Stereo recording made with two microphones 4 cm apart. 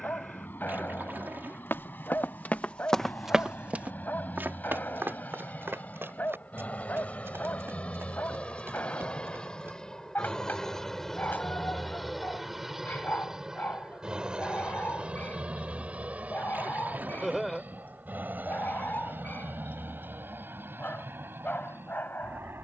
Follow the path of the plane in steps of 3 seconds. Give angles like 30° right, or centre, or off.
60° left, 50° left, 40° left, 10° left, 10° right, 40° right, 50° right, 60° right.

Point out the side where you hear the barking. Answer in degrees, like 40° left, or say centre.
50° left.